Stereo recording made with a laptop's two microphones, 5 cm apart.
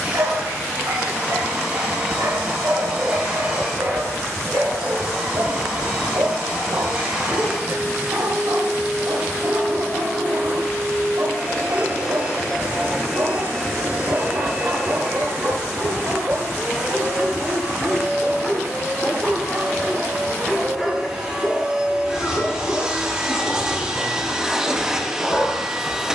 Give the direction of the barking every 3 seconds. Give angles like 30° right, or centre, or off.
60° right, 60° right, 60° right, 60° right, 60° right, 50° right, 10° right, 20° left, 30° left.